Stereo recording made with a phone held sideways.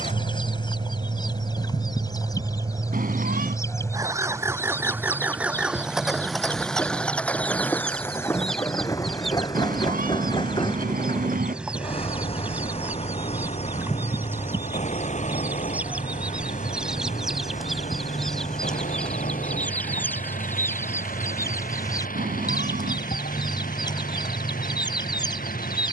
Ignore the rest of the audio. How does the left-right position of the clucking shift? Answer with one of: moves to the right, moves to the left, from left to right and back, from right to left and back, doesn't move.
from left to right and back.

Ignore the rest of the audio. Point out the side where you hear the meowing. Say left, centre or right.
right.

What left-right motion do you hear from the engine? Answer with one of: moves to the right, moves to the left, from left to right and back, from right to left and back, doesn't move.
moves to the left.